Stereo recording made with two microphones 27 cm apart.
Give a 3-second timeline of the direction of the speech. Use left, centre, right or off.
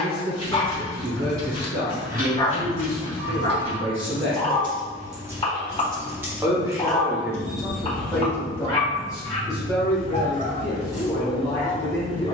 right, right, centre, centre.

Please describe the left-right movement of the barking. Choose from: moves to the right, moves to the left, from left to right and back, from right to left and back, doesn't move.
doesn't move.